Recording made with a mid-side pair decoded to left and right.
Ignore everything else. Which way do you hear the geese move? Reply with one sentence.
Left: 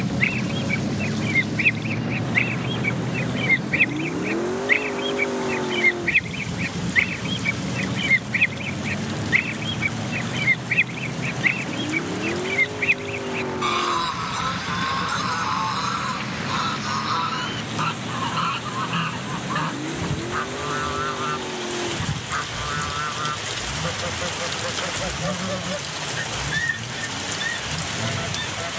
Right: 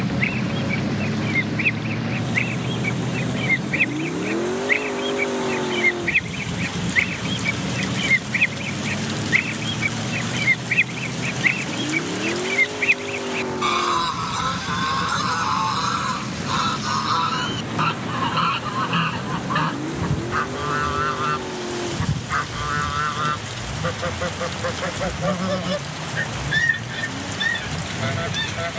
You can hear the geese move from left to right.